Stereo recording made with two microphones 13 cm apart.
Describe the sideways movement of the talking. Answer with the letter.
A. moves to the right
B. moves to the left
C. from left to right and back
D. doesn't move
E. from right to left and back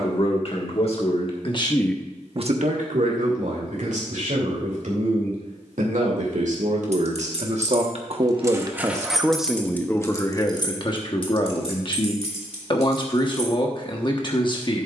C.